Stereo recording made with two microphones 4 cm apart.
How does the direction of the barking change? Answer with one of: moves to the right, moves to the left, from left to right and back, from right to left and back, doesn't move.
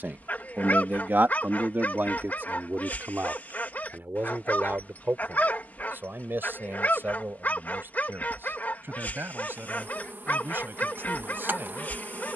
doesn't move.